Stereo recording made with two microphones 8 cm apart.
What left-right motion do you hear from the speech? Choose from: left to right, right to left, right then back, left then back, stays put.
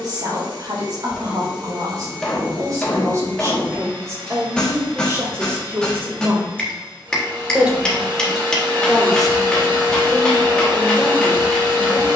right to left.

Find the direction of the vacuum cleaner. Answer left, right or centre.
right.